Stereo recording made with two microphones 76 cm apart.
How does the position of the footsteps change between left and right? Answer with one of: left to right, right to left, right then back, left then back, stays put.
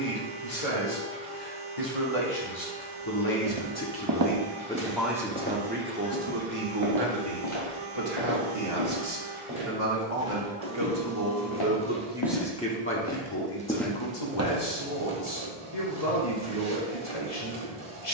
left then back.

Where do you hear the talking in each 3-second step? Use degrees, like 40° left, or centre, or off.
50° left, 10° left, 40° right, 40° right, 30° left, 50° left.